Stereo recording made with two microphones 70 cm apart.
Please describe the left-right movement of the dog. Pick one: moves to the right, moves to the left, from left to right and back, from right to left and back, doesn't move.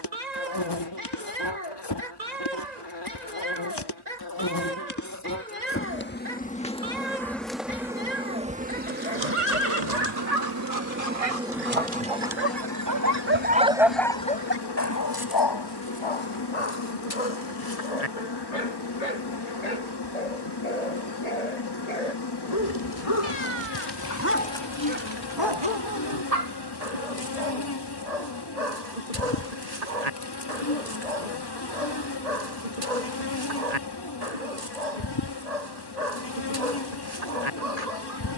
from right to left and back.